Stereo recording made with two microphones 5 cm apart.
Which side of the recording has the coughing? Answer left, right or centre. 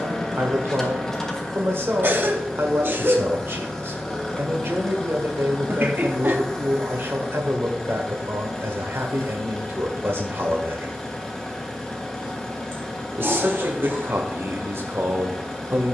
right.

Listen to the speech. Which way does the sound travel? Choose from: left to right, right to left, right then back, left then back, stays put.
stays put.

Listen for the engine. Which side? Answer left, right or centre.
centre.